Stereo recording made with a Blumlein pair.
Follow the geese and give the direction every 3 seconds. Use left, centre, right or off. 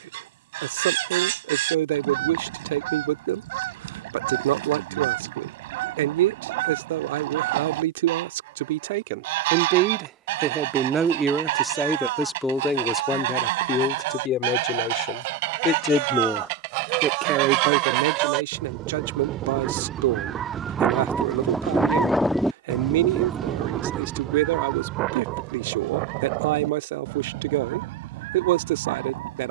right, right, right, right, right, right, right, centre, right, right.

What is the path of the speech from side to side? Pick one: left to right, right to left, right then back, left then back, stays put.
left then back.